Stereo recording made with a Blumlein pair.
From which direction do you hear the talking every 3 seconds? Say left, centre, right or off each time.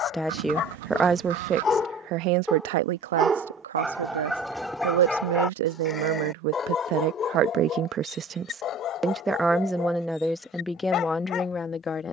right, right, right, centre.